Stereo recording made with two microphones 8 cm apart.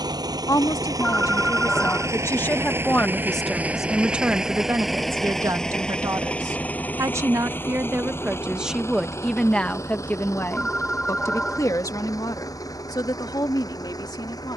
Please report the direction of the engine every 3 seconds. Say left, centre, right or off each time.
right, centre, left, left, left.